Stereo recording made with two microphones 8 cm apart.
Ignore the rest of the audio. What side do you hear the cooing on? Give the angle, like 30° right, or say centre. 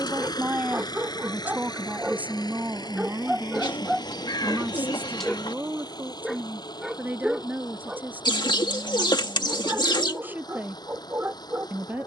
70° left.